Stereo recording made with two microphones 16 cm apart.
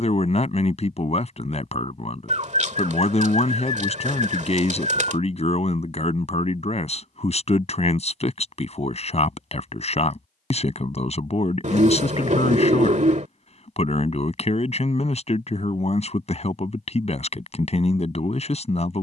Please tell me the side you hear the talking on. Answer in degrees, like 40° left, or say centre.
40° left.